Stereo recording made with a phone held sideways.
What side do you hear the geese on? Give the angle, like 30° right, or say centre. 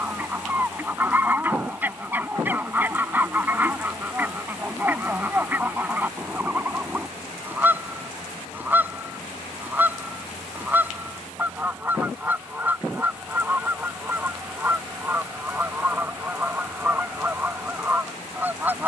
10° right.